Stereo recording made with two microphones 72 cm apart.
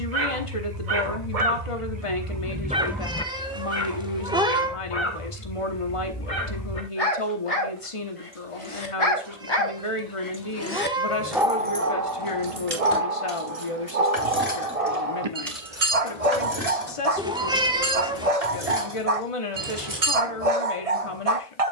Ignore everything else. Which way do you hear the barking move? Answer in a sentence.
You can hear the barking move from right to left and back again.